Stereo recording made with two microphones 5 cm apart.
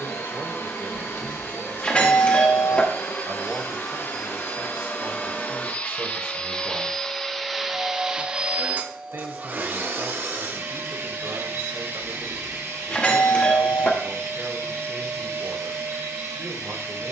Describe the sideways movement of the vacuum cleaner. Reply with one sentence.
In this clip you hear the vacuum cleaner travel towards the right.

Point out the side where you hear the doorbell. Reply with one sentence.
You can hear the doorbell on the left.